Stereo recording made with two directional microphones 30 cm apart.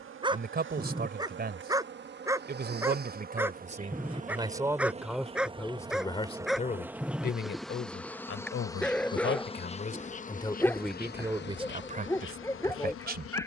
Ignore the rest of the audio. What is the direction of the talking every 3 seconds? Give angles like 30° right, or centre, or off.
30° right, 10° right, 40° left, 10° left, 30° right.